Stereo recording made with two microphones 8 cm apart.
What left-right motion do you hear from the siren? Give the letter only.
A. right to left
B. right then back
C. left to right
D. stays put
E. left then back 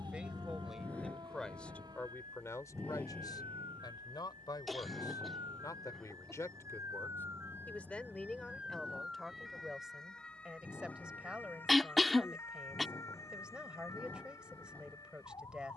A.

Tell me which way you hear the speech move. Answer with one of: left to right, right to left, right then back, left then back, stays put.
left then back.